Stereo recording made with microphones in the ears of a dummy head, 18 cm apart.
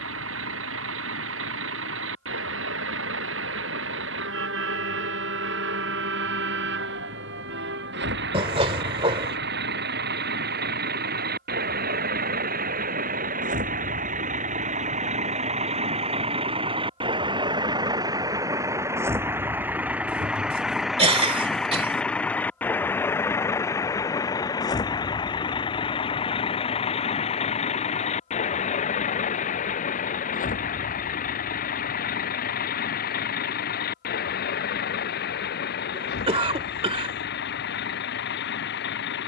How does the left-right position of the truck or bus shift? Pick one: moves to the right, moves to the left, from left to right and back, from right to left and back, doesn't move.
moves to the left.